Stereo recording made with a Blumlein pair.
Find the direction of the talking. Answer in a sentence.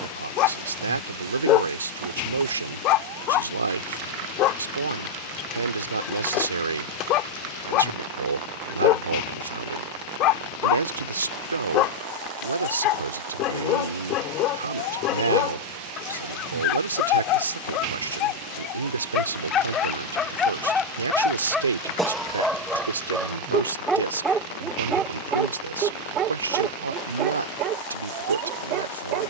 In this clip you hear the talking on the right.